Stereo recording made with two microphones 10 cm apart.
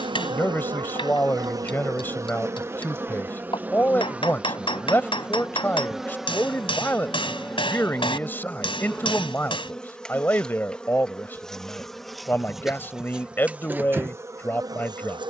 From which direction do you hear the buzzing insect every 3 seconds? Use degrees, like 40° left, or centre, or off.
40° right, 10° right, centre, 10° left, 20° right.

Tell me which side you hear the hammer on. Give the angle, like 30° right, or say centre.
60° left.